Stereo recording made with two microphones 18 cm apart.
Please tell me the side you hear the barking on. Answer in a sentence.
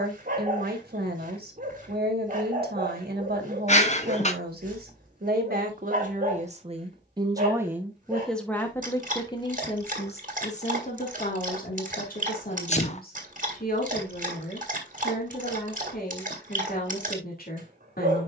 You can hear the barking on the right.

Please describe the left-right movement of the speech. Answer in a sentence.
You can hear the speech go from the right side to the left.